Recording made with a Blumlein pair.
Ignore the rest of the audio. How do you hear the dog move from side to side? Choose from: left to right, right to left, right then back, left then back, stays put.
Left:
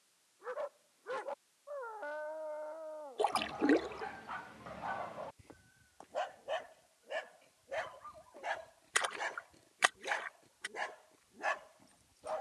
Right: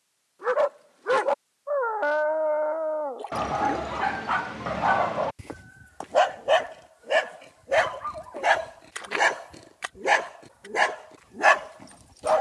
stays put.